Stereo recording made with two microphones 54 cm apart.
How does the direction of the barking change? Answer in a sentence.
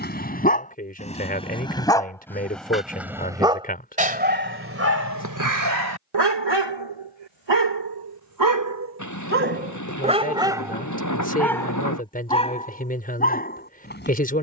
You can hear the barking move from left to right and back again.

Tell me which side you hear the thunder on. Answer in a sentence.
In this clip you hear the thunder on the left.